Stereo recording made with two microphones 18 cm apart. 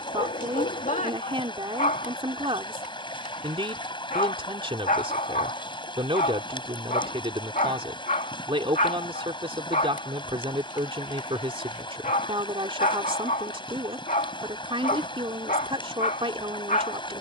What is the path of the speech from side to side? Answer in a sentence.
In this clip you hear the speech stay put.